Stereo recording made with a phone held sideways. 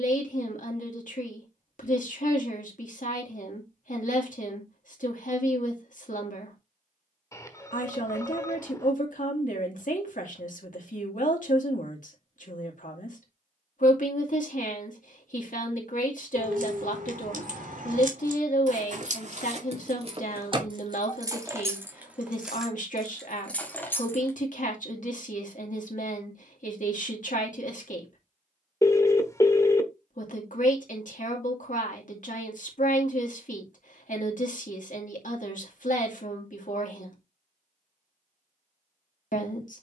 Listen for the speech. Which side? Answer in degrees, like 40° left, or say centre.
70° left.